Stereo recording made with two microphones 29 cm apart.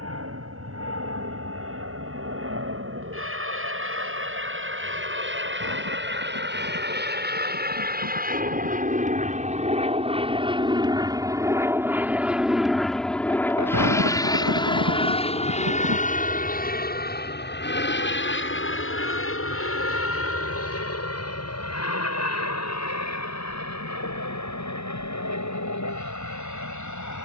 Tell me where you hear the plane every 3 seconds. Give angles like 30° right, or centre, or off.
60° right, 50° right, 40° right, 20° right, 10° left, 30° left, 40° left, 60° left, 60° left.